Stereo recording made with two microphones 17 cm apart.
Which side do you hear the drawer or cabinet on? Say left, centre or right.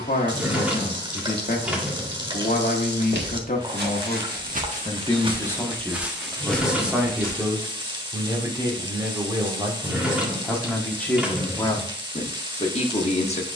centre.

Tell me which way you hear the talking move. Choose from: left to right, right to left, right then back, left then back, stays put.
right then back.